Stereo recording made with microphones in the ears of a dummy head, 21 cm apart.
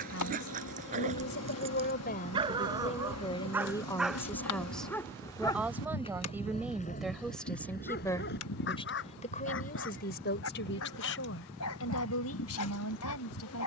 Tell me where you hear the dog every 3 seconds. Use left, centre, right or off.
right, centre, left, left, left.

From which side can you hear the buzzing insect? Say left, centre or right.
left.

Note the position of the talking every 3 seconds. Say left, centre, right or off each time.
left, centre, centre, left, left.